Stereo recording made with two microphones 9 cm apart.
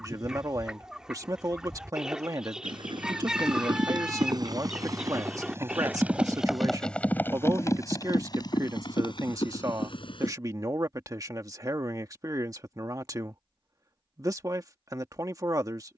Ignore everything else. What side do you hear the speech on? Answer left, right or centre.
right.